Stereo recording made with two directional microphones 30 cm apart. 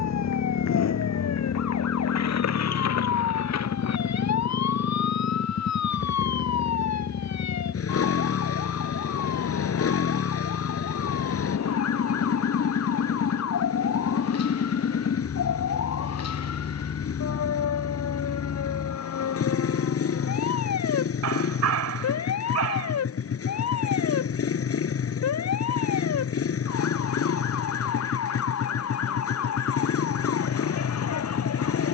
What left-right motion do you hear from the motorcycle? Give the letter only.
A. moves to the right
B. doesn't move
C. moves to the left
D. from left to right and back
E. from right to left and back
B.